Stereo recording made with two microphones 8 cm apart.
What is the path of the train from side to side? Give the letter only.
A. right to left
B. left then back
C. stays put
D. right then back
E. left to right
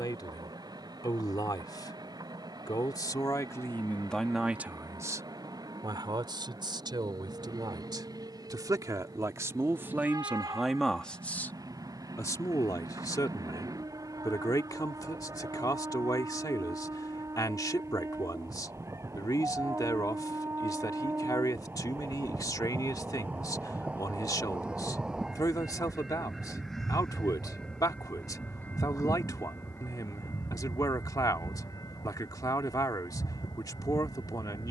A.